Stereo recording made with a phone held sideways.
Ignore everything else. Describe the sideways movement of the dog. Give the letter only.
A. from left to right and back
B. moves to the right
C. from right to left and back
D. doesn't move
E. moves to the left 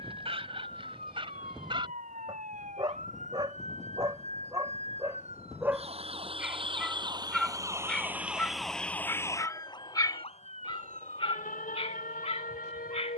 E.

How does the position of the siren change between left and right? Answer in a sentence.
In this clip you hear the siren move from right to left.